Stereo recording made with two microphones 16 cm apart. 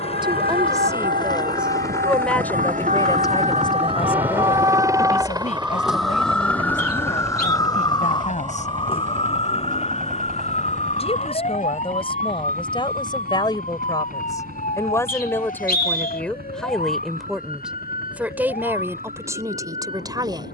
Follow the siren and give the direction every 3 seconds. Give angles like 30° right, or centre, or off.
70° right, 30° right, 20° left, 40° left, 50° left, 60° left, 60° left.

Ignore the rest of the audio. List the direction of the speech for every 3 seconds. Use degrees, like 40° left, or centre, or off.
10° right, 40° left, 50° left, 40° left, 30° left, 10° left, 20° right.